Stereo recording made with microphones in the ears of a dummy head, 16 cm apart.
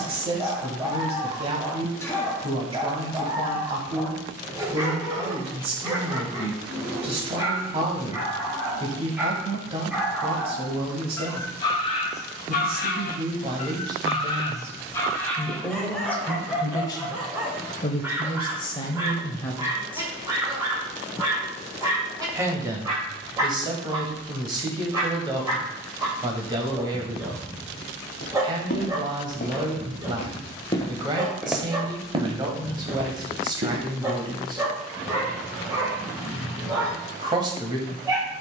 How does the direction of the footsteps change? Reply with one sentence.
In this clip you hear the footsteps go from the left side to the right.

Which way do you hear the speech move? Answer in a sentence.
In this clip you hear the speech move from right to left and back again.